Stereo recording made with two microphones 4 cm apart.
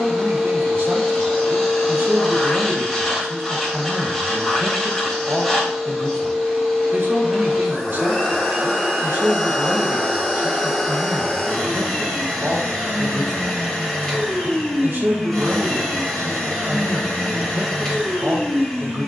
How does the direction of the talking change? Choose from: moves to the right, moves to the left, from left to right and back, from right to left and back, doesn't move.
doesn't move.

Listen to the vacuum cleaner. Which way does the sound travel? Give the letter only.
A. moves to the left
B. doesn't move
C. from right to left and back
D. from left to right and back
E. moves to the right
B.